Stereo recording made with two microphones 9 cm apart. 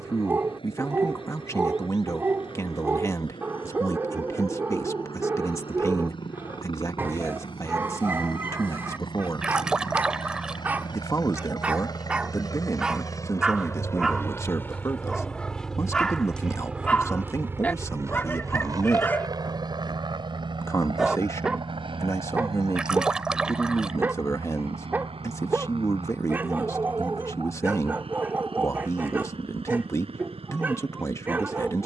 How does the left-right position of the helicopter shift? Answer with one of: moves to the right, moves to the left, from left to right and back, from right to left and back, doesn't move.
moves to the right.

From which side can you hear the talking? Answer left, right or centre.
left.